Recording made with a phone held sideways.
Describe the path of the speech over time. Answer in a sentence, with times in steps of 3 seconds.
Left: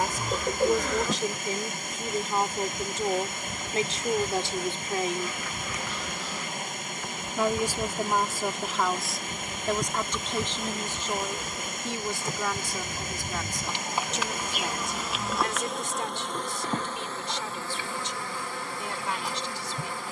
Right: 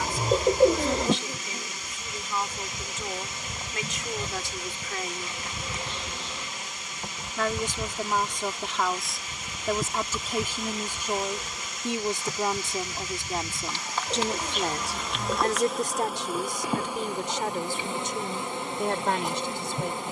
You can hear the speech on the left from 0 s, in the centre from 6 s and on the right from 12 s.